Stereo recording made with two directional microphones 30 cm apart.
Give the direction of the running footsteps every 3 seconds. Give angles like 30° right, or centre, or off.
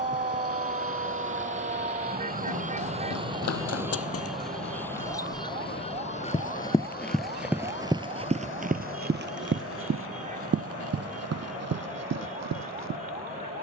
60° left, 50° left, 10° right, 50° right, 60° right.